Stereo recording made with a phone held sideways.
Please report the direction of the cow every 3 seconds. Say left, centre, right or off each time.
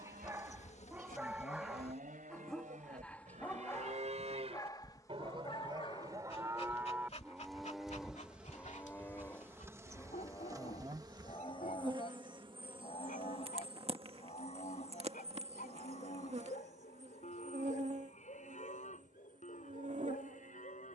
right, right, centre, left, left, left, left.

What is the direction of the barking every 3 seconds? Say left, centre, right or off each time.
centre, left, left, left, left, left, left.